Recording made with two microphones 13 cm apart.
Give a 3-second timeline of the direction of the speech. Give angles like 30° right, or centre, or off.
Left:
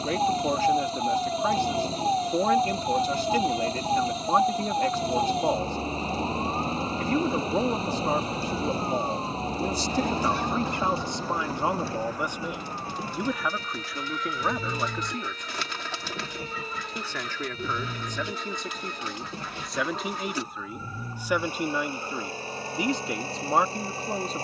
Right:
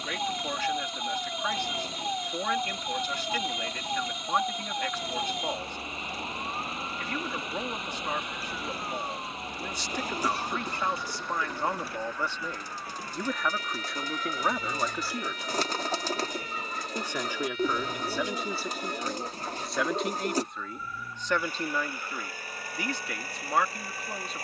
30° left, 30° left, 30° left, 30° left, centre, 10° right, centre, 20° left.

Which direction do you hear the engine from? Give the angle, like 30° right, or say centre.
30° left.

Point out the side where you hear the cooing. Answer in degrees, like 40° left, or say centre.
40° right.